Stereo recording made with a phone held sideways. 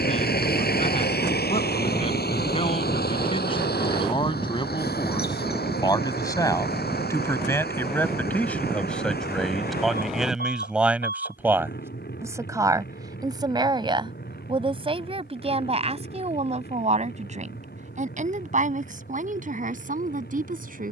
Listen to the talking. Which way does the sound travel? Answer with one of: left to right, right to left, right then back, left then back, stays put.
left to right.